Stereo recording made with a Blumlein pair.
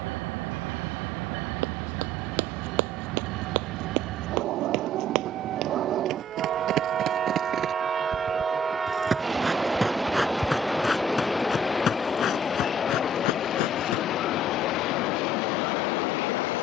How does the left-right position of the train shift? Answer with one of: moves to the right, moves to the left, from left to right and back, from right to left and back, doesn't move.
moves to the left.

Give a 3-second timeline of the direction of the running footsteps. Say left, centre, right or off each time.
right, right, right, centre, left, off.